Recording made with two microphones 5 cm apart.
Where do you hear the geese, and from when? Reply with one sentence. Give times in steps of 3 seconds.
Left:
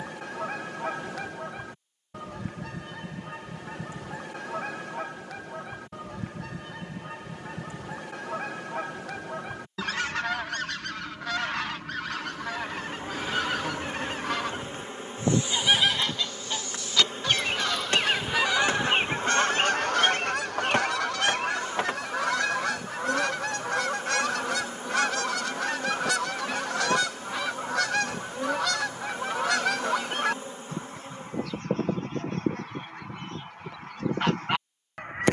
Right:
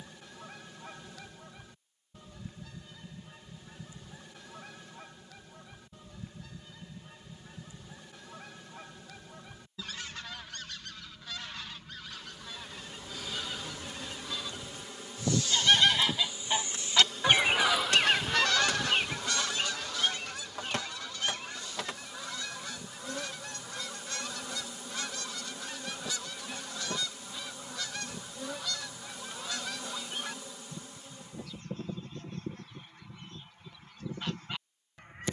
You can hear the geese on the left from 0 s, in the centre from 15 s and on the left from 18 s.